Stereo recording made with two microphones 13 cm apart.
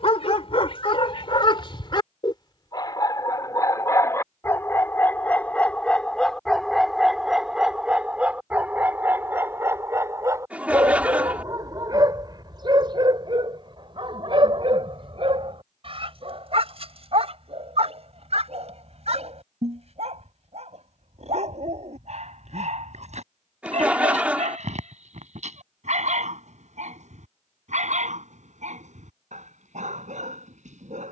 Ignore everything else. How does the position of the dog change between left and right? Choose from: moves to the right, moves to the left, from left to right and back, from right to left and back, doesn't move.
moves to the right.